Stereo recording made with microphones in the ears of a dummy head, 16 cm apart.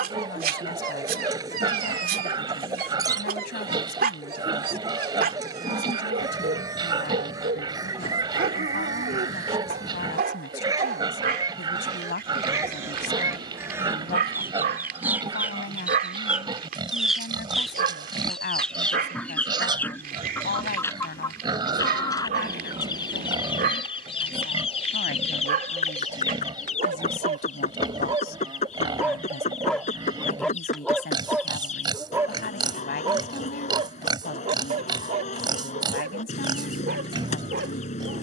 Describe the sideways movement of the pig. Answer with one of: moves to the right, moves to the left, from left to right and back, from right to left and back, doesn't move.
doesn't move.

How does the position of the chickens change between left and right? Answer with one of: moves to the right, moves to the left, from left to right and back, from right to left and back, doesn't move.
moves to the left.